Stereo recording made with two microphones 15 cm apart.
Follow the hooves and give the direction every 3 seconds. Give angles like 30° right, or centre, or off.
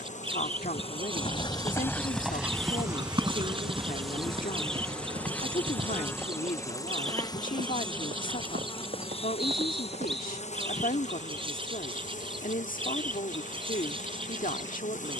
10° left, 40° right, 50° right, 50° right, off.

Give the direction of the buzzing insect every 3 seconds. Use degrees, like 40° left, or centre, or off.
30° left, centre, 30° left, 50° left, 60° left.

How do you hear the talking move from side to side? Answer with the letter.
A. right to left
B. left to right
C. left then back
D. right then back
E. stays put
E.